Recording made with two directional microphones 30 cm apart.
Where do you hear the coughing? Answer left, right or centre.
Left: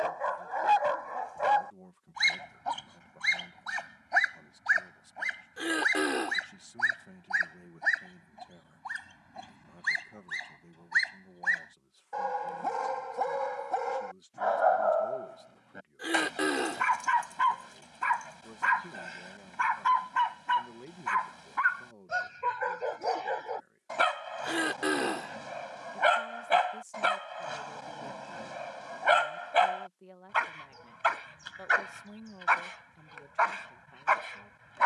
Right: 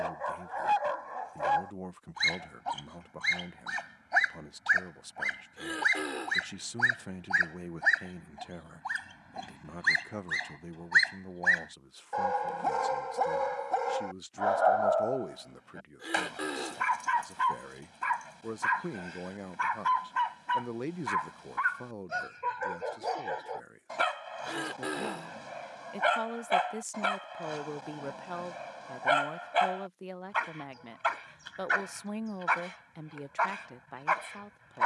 left.